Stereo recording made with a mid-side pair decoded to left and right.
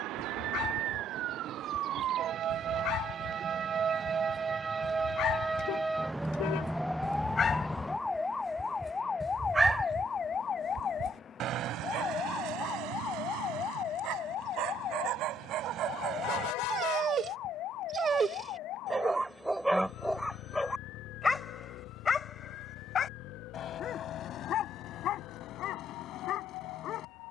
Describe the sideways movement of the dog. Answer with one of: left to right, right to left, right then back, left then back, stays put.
right then back.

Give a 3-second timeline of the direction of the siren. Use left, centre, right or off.
right, right, centre, left, left, left, left, left, left.